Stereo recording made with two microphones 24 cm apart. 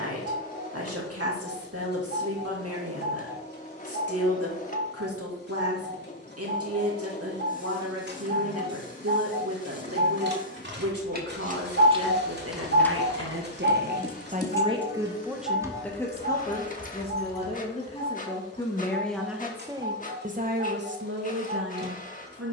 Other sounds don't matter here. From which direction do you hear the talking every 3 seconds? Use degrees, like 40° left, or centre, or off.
80° right, 80° right, 80° right, 80° right, 50° right, 10° left, 10° right, 70° right.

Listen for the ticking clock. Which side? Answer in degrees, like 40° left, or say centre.
50° right.